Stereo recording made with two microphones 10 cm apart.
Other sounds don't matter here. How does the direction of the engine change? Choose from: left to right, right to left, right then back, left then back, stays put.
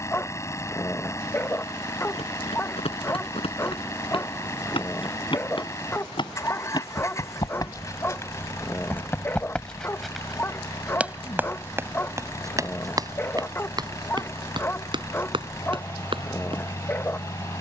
stays put.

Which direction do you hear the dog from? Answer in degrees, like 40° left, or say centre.
20° left.